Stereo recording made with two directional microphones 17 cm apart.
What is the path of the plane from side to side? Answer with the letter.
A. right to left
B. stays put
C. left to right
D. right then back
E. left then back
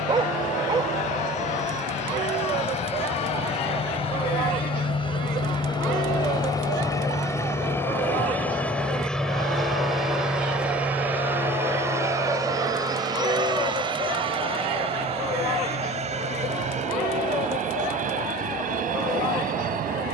C.